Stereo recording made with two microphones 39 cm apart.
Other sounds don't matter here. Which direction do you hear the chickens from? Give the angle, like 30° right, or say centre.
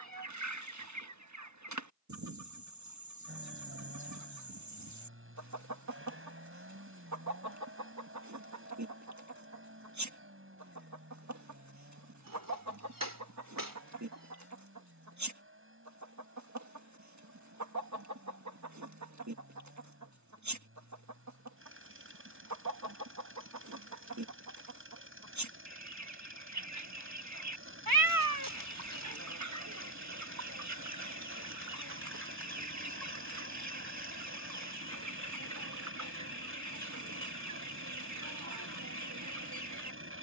50° right.